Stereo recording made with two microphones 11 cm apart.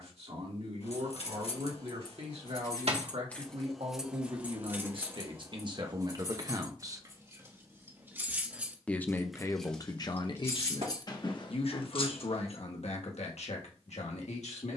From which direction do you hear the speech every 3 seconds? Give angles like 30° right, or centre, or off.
60° right, 50° right, 30° right, 40° left, 70° left.